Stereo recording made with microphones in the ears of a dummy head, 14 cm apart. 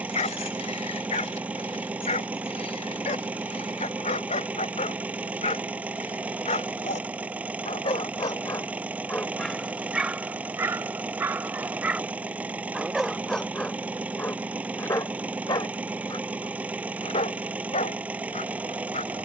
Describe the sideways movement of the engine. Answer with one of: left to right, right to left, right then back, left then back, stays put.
stays put.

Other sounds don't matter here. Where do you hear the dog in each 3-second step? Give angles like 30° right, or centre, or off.
40° left, 40° left, 40° left, 10° right, 10° left, 30° left, 40° left.